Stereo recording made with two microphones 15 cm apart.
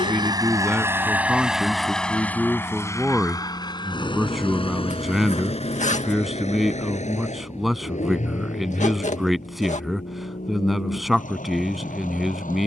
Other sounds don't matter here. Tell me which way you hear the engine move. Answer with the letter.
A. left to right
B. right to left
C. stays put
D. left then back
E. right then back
B.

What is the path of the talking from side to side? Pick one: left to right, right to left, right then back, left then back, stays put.
stays put.